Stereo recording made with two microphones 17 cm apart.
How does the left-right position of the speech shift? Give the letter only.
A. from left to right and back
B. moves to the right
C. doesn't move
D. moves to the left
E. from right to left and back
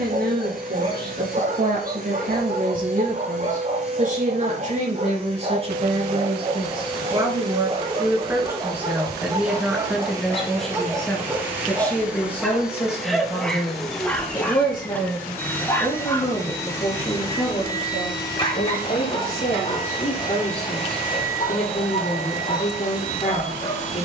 D.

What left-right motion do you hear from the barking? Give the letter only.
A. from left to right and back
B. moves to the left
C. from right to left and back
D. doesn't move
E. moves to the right
B.